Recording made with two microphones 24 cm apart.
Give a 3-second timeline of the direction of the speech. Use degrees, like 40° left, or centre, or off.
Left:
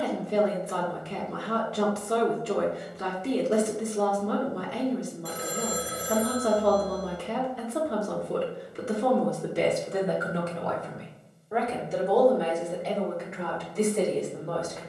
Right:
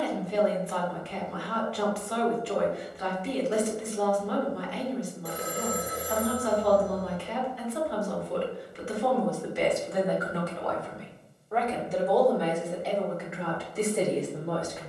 40° left, 40° left, 40° left, 20° left, centre.